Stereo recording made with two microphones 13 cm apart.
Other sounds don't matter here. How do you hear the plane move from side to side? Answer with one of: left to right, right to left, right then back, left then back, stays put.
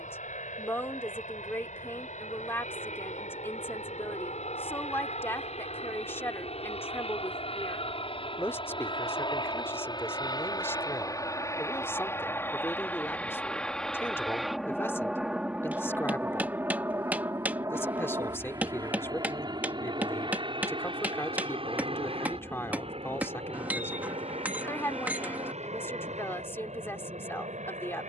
left to right.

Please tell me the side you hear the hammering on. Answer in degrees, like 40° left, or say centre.
10° right.